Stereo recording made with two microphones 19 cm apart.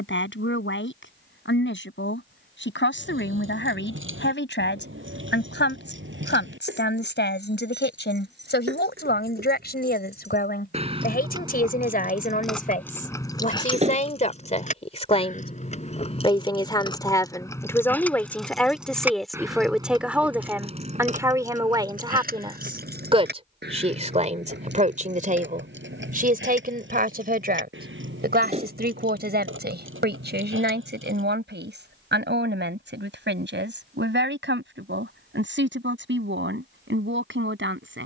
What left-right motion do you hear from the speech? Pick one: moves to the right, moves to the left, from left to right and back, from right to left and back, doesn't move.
moves to the right.